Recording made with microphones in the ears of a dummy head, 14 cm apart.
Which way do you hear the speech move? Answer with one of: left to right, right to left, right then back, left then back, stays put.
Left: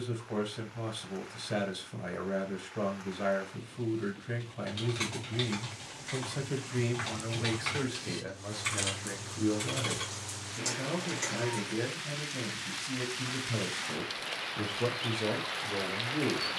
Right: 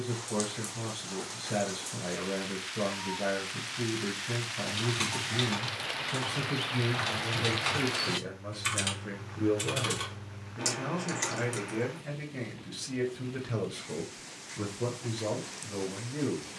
right then back.